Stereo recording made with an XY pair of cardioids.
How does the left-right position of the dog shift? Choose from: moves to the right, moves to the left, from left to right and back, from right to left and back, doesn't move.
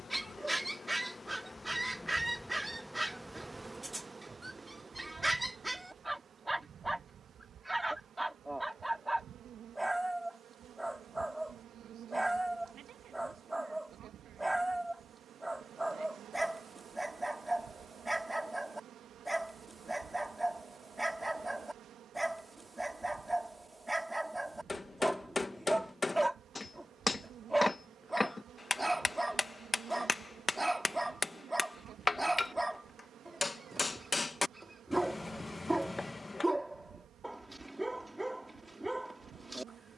doesn't move.